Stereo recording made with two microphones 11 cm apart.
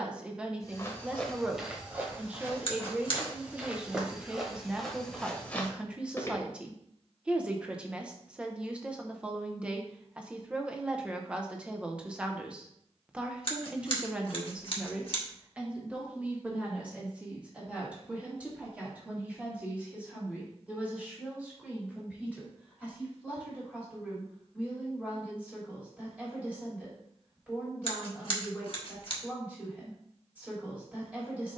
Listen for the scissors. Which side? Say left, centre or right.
left.